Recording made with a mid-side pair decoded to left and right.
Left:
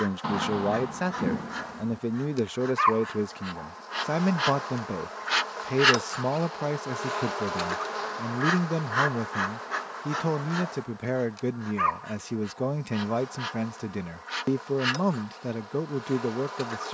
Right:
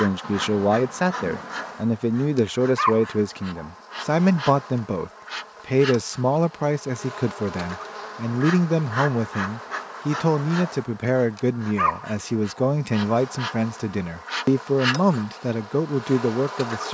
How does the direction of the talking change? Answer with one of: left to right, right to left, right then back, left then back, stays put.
stays put.